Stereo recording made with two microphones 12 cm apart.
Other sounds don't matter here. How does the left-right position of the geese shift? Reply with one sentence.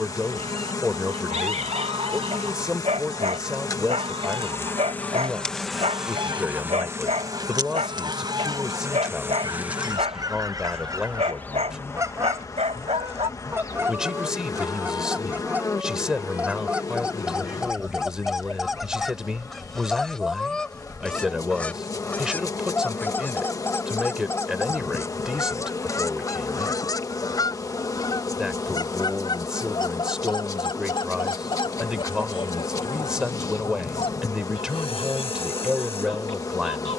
In this clip you hear the geese travel towards the left.